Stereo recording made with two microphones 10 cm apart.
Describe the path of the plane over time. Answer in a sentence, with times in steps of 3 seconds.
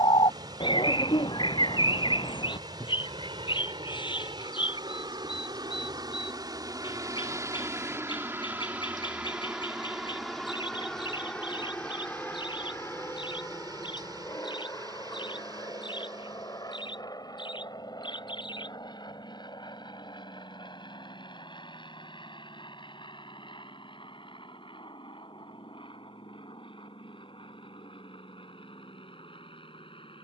You can hear the plane on the right from 0 s, in the centre from 9 s and on the left from 12 s.